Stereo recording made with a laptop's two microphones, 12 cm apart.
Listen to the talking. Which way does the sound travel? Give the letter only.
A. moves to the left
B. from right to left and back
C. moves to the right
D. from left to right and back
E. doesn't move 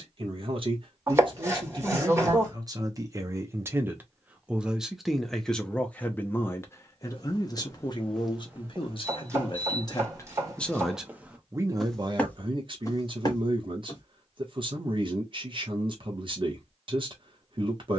B.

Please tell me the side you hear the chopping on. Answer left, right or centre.
right.